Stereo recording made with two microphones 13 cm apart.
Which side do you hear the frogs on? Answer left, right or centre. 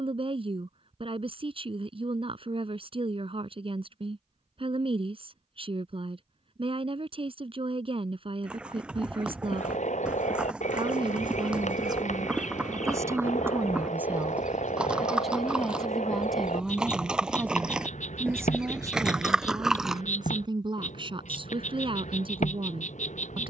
left.